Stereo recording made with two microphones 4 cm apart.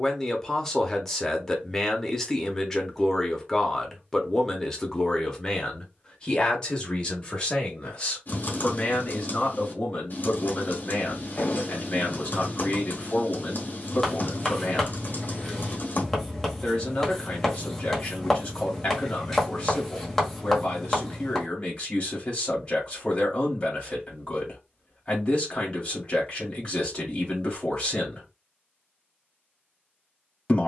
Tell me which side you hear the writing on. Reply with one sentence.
In this clip you hear the writing in the centre.